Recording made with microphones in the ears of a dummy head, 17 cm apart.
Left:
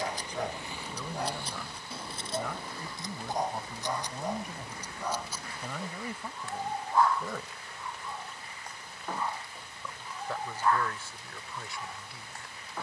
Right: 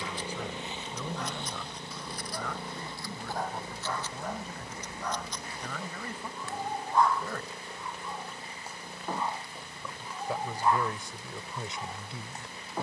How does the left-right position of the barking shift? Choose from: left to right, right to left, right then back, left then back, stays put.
left to right.